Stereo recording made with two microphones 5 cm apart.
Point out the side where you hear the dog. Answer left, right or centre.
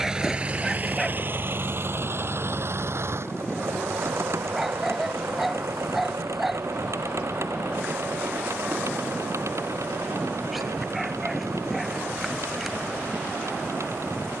centre.